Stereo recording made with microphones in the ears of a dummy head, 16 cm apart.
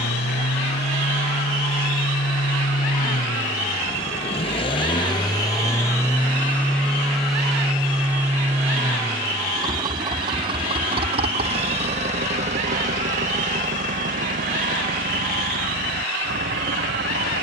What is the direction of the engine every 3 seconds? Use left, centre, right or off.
left, left, centre, right, right, right.